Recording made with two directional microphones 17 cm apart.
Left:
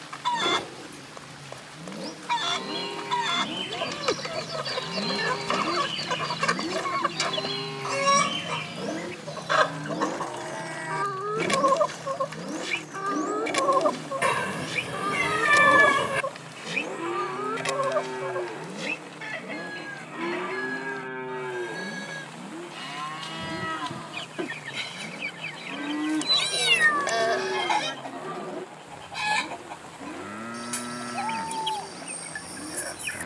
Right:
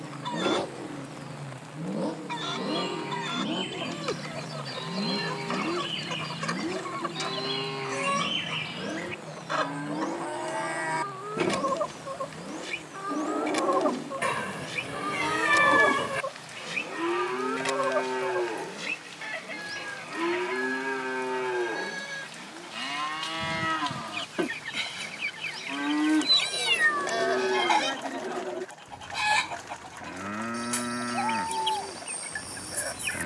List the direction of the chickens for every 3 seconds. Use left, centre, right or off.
left, left, left, left, left, centre, centre, centre, centre, centre, centre.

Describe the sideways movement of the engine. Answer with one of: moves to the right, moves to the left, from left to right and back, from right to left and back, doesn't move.
moves to the left.